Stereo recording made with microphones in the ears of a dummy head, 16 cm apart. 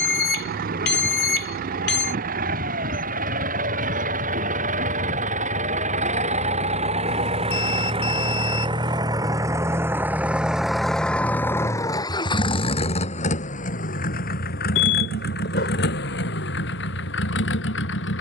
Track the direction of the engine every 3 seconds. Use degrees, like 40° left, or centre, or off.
60° right, 50° right, 40° right, centre, 50° left, 70° left.